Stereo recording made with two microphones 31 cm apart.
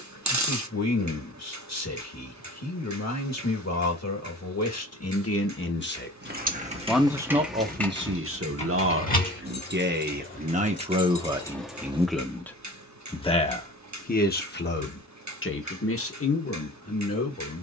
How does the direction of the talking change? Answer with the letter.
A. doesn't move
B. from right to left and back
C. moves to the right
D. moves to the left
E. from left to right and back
E.